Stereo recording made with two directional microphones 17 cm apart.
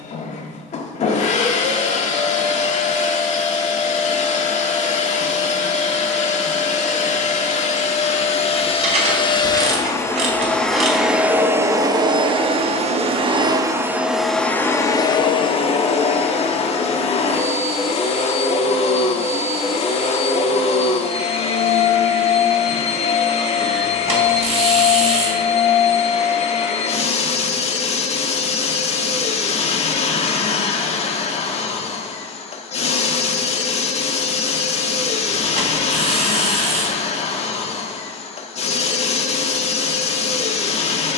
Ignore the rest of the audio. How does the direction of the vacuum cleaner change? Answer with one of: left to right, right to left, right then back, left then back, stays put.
right then back.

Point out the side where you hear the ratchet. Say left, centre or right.
right.